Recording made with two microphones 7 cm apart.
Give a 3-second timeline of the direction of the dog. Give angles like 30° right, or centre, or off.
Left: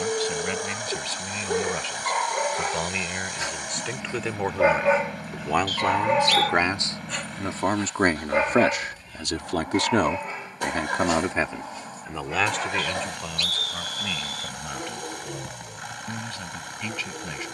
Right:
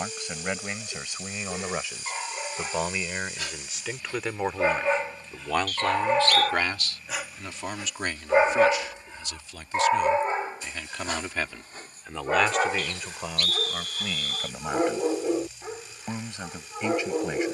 40° left, 20° left, 10° right, 30° right, 50° right, 50° right.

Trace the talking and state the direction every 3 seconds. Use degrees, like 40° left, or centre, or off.
10° right, centre, 40° left, 50° left, 10° right, 20° right.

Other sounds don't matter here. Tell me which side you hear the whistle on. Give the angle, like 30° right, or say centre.
50° right.